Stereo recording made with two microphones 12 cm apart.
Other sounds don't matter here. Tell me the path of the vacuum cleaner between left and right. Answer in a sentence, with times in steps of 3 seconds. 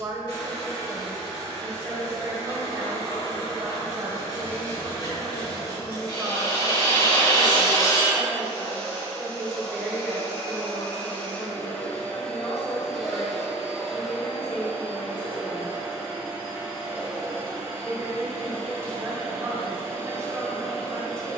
In this clip you hear the vacuum cleaner on the left from 0 s, in the centre from 12 s and on the right from 15 s.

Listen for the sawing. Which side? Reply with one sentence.
In this clip you hear the sawing on the left.